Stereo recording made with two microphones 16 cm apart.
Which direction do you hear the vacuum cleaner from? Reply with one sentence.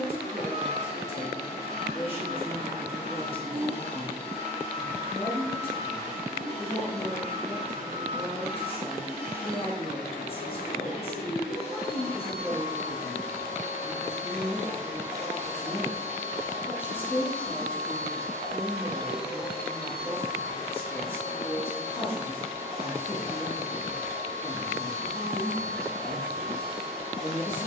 You can hear the vacuum cleaner on the left.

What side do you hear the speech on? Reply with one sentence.
In this clip you hear the speech on the left.